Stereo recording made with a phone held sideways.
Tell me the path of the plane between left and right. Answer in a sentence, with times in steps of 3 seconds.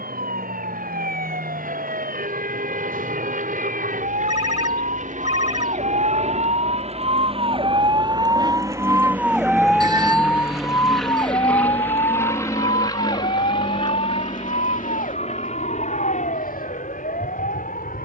You can hear the plane on the right from 0 s, in the centre from 9 s and on the left from 12 s.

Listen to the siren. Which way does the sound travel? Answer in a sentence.
In this clip you hear the siren go from the right side to the left.